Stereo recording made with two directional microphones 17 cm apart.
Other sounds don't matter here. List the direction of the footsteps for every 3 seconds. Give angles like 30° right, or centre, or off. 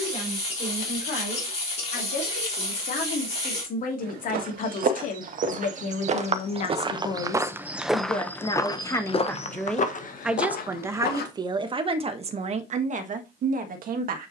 off, 50° right, 10° right, 50° left, off.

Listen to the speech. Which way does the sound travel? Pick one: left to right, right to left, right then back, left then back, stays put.
left to right.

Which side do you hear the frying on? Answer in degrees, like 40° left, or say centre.
40° left.